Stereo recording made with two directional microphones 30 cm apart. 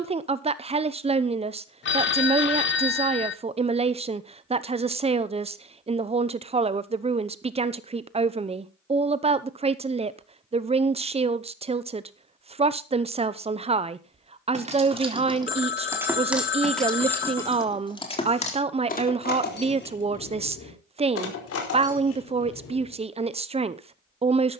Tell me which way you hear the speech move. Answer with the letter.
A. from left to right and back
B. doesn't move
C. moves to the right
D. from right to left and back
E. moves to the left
B.